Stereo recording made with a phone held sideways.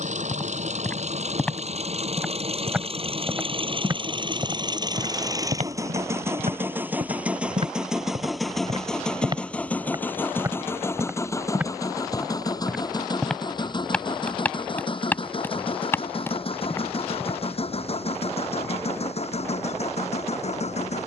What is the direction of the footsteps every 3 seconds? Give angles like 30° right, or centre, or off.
10° left, 40° right, 50° right, 20° right, centre, 20° left, off.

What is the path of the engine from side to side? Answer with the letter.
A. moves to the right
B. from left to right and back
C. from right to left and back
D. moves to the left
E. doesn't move
D.